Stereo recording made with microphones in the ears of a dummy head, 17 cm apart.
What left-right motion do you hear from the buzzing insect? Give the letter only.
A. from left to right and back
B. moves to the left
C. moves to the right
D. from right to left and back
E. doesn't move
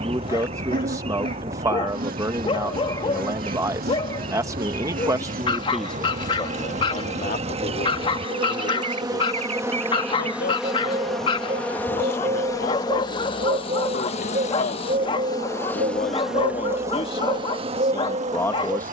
D.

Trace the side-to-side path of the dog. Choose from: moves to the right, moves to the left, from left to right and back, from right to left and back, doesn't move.
doesn't move.